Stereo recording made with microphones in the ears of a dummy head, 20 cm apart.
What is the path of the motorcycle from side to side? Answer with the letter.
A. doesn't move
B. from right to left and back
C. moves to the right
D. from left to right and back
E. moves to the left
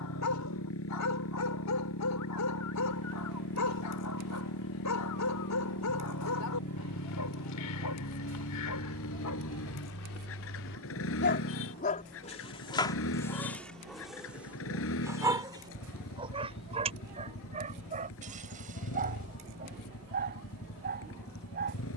A.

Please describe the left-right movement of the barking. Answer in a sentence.
You can hear the barking travel towards the right.